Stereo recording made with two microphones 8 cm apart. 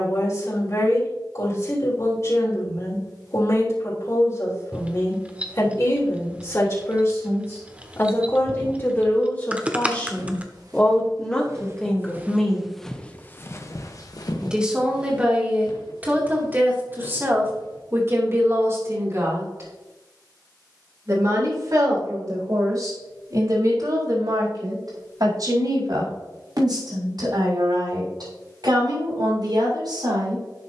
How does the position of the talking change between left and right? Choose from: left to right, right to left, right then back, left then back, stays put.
left to right.